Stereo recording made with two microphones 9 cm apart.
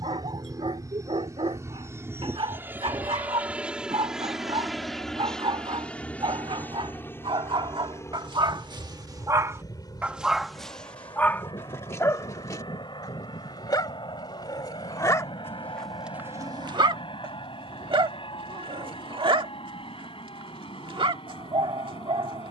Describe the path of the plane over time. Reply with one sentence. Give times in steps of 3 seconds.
In this clip you hear the plane on the right from 0 s, in the centre from 3 s and on the left from 6 s.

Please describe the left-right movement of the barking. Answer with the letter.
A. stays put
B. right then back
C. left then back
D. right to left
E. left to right
C.